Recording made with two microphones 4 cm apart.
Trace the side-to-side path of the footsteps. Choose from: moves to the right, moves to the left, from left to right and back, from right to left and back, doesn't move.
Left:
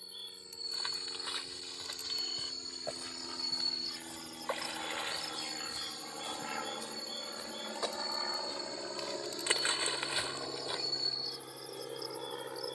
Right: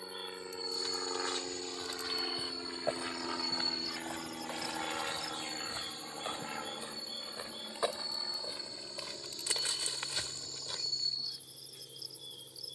from left to right and back.